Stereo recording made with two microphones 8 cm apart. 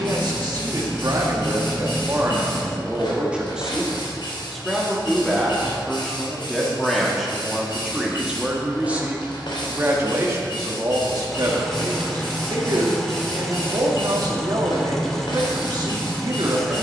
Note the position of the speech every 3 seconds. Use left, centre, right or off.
right, centre, centre, right, right, right.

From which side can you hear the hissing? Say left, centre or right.
left.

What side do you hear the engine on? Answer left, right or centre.
centre.